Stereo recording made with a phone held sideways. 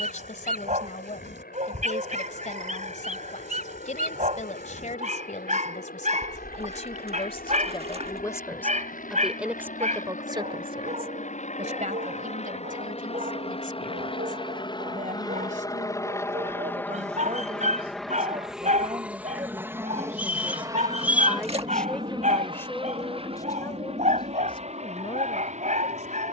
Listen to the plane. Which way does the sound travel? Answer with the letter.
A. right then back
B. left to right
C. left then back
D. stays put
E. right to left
B.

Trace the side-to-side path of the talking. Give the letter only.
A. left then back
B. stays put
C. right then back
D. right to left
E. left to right
C.